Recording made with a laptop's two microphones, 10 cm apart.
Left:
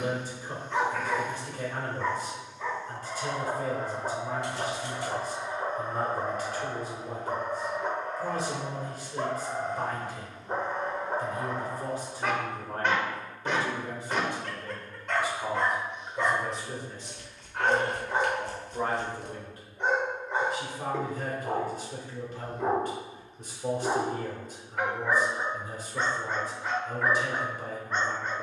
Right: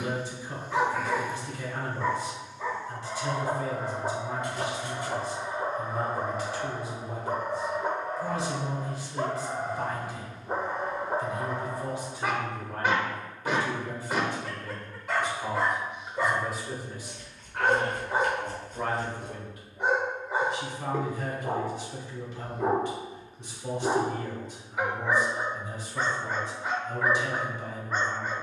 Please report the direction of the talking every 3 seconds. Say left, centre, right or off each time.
left, left, left, left, left, centre, left, left, left, left.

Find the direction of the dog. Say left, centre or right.
centre.